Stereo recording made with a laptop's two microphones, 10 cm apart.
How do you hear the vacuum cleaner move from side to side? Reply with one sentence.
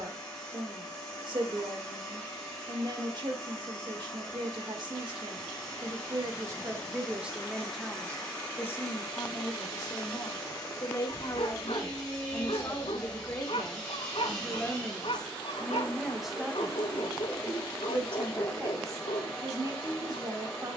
You can hear the vacuum cleaner stay in one place.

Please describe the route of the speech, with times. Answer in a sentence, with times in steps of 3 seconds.
In this clip you hear the speech on the right from 0 s, in the centre from 6 s, on the left from 9 s, in the centre from 15 s and on the right from 18 s.